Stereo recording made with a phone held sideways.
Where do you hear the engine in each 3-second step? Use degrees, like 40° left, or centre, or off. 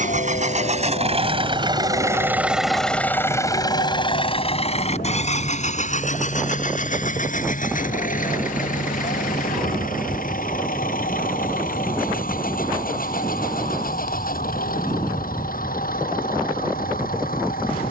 30° right, 40° left, 60° left, 70° left, 80° left, 80° left.